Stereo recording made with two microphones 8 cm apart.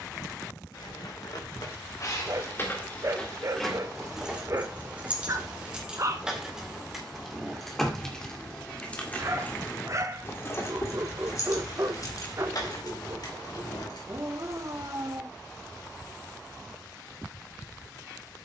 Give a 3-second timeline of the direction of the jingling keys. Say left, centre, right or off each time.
left, centre, centre, left, left, off.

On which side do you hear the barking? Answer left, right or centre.
right.